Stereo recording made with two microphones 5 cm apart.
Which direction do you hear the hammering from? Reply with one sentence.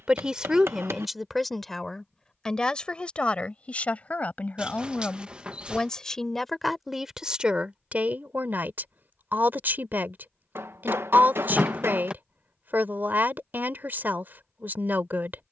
You can hear the hammering on the right.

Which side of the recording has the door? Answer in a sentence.
In this clip you hear the door on the right.